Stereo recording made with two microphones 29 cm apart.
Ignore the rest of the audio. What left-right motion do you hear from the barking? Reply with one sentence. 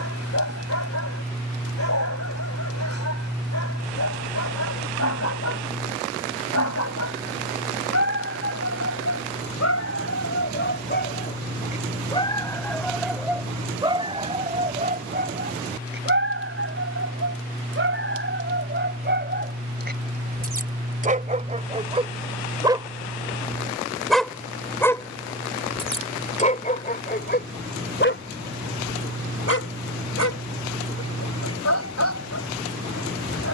In this clip you hear the barking go right and come back.